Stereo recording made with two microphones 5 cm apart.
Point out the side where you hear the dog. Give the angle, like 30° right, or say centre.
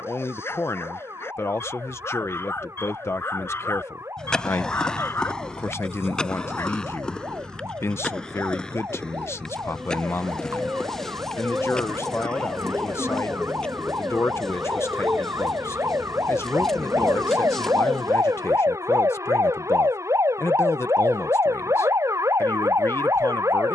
50° left.